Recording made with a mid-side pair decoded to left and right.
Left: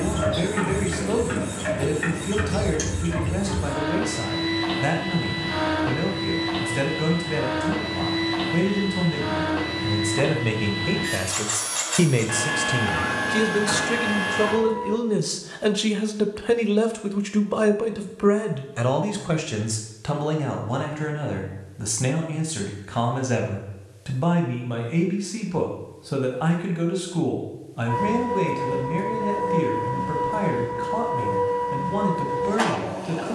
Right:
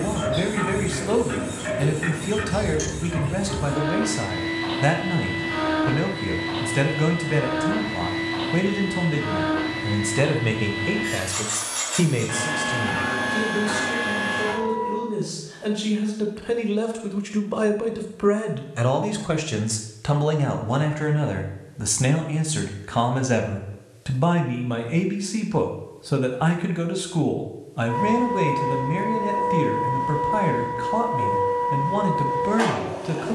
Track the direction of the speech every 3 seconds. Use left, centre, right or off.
right, right, right, centre, left, left, centre, right, right, right, right.